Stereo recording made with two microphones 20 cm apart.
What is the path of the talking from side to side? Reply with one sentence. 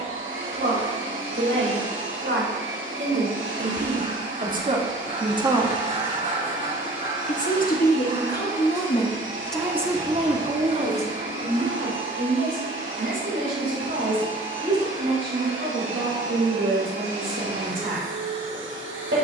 In this clip you hear the talking go left and come back.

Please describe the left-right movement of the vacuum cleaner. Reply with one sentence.
You can hear the vacuum cleaner stay put.